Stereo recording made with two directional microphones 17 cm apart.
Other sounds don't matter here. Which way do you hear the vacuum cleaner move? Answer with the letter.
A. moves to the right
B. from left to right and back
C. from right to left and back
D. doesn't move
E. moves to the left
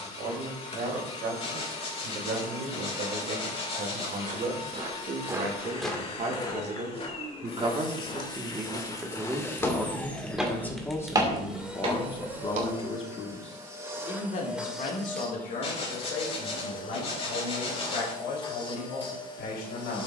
B.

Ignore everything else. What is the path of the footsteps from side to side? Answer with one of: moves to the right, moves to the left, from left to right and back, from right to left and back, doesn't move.
from right to left and back.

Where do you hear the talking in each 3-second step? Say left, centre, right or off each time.
right, right, right, centre, left, left, left.